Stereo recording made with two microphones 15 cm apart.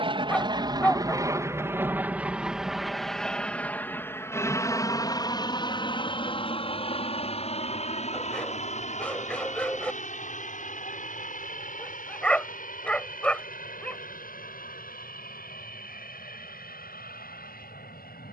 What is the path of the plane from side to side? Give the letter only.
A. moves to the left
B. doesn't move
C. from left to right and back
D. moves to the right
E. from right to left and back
A.